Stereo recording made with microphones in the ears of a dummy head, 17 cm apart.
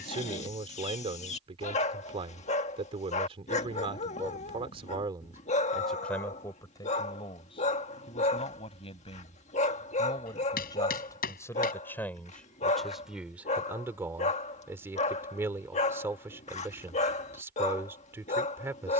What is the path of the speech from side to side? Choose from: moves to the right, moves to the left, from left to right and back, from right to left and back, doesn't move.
from right to left and back.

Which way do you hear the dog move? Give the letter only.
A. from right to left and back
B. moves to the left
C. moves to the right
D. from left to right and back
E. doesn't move
E.